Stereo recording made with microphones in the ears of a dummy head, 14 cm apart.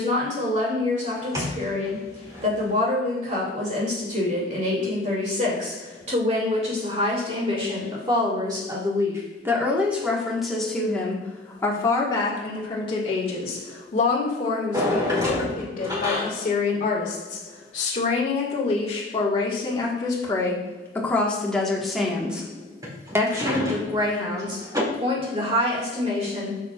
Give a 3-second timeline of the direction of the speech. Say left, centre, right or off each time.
right, right, right, centre, left, left, left, centre, right.